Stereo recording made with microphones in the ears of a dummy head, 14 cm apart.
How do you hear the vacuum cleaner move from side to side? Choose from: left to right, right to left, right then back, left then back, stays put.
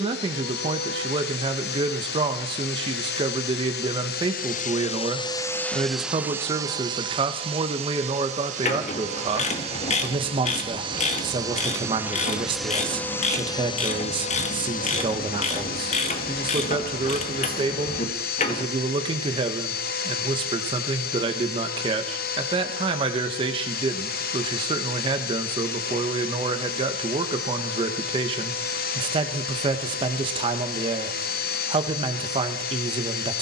right then back.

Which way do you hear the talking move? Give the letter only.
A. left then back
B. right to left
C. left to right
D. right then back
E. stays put
E.